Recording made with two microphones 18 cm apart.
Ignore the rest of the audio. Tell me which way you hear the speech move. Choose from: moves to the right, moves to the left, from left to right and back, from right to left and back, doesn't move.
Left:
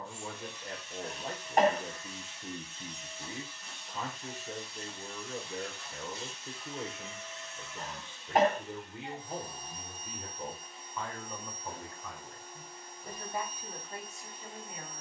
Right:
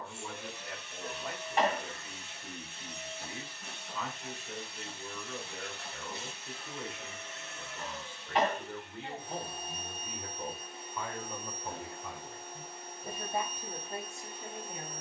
moves to the right.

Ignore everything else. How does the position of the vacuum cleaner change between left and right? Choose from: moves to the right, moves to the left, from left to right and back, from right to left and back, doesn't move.
doesn't move.